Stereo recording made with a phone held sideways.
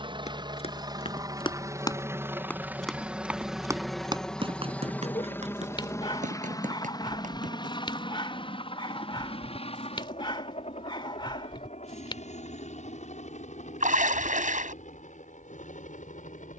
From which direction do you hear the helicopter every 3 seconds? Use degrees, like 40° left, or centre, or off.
20° right, 10° left, 30° left, 50° left, 60° left, 60° left.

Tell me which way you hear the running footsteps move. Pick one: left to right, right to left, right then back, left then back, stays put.
left to right.